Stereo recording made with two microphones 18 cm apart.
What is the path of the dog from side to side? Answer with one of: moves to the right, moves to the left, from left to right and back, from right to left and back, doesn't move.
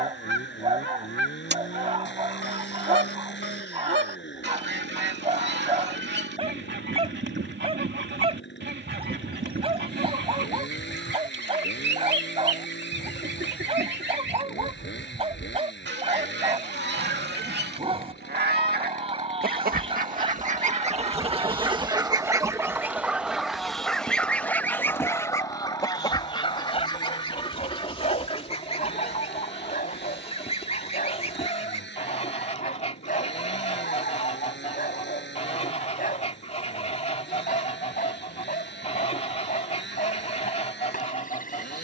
moves to the left.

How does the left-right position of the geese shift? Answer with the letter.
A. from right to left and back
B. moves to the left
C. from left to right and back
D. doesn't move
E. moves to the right
B.